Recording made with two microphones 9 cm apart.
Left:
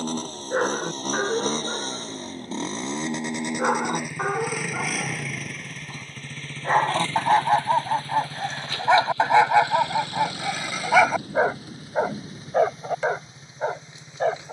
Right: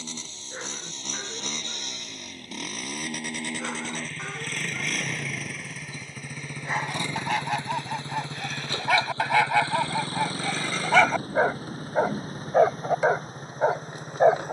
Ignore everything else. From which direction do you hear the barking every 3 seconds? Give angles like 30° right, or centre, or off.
60° left, 50° left, 30° left, 10° left, 20° right.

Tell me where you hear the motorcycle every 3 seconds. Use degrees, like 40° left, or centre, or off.
40° left, 10° left, 20° right, 40° right, 50° right.